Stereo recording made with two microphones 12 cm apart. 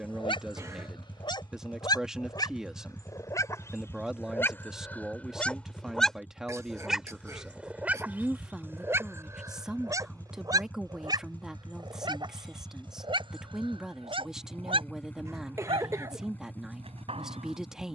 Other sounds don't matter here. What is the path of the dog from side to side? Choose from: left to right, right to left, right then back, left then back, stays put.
left to right.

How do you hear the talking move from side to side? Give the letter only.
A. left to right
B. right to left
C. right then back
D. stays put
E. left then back
D.